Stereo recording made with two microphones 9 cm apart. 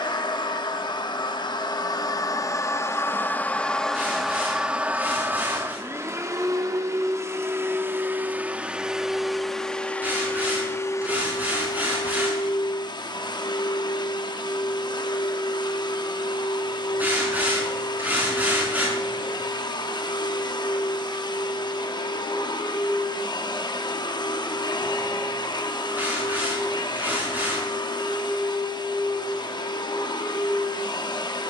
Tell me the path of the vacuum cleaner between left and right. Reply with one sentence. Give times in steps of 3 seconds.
You can hear the vacuum cleaner on the left from 0 s, in the centre from 3 s, on the right from 6 s and on the left from 9 s.